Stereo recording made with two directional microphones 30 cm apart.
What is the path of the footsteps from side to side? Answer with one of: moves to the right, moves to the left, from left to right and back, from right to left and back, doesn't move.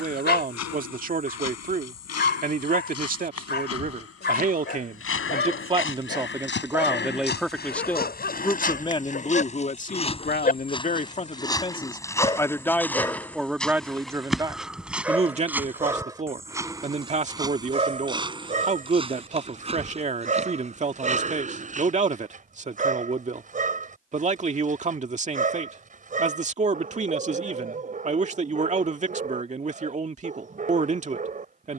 moves to the right.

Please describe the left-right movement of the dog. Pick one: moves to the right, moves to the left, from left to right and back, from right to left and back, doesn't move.
moves to the right.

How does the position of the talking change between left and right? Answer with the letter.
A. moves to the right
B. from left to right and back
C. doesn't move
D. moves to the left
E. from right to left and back
E.